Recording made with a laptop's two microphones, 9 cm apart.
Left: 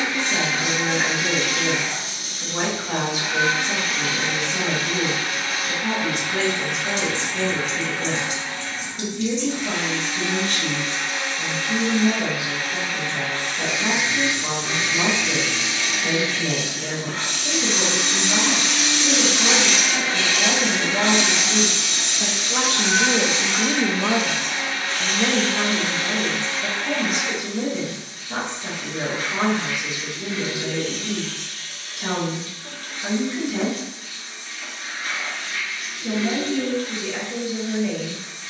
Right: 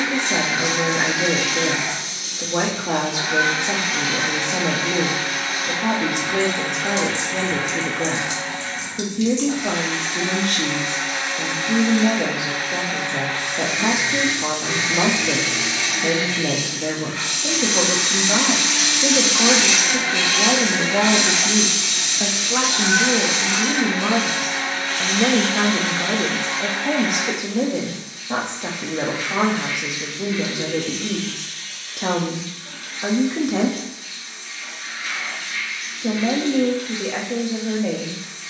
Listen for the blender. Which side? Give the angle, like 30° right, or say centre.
80° right.